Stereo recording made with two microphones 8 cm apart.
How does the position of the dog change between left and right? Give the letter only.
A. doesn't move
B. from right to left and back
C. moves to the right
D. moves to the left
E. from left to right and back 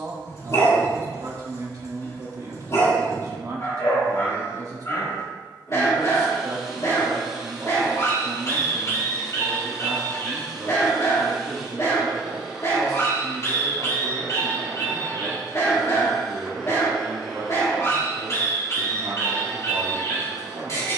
A.